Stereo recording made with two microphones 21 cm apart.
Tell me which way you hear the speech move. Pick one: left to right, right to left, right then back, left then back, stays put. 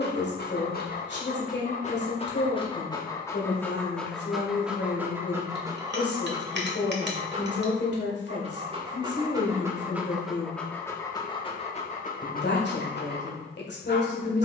stays put.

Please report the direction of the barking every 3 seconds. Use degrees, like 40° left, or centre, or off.
40° left, centre, 30° right, centre, 50° left.